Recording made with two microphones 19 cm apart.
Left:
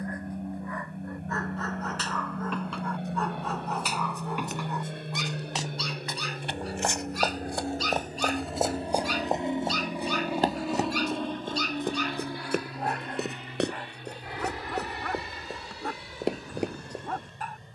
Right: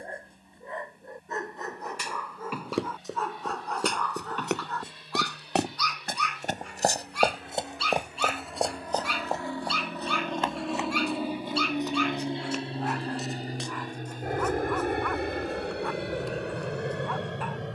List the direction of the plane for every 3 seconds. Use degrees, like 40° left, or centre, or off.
70° left, 60° left, 40° left, centre, 30° right, 50° right.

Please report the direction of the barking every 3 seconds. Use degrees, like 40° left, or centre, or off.
10° right, 10° left, 40° left, 40° left, 40° left, 40° left.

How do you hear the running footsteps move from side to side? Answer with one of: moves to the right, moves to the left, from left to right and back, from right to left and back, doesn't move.
moves to the left.